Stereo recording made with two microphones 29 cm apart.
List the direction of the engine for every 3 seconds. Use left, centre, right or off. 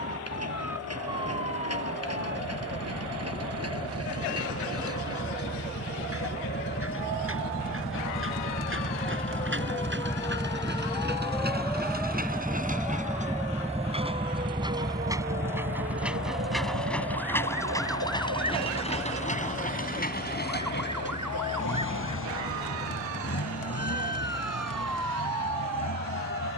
right, right, right, right, right, centre, left, left, left.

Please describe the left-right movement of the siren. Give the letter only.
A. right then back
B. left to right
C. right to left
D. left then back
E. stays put
B.